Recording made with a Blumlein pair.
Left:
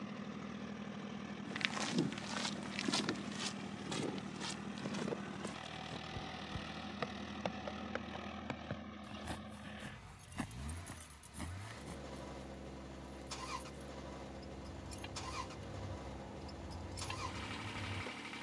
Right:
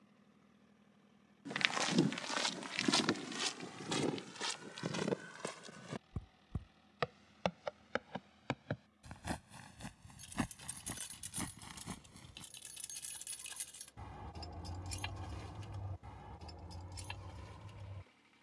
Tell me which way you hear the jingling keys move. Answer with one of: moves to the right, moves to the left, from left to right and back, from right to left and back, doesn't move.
moves to the left.